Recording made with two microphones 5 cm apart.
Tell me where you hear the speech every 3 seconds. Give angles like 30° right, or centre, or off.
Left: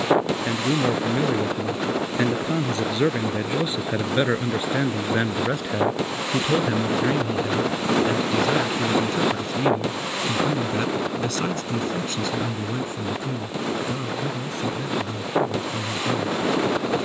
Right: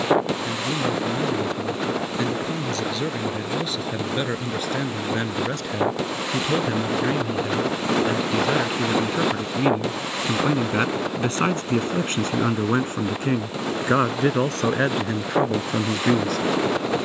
30° left, 20° left, centre, 20° right, 50° right, 70° right.